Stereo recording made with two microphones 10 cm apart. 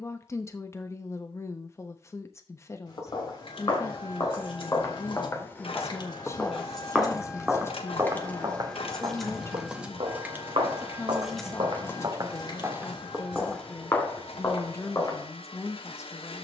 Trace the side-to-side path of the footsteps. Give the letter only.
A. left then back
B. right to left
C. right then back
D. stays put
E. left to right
C.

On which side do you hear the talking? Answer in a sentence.
You can hear the talking on the left.